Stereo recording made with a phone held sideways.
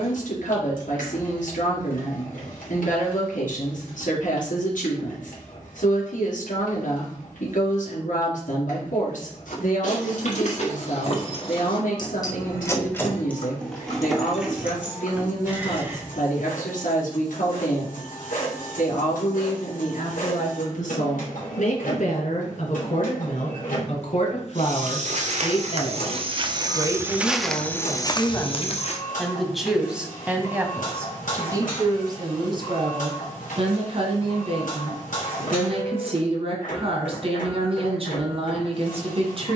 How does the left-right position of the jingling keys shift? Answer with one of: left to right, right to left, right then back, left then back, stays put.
left to right.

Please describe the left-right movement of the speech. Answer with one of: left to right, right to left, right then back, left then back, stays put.
left to right.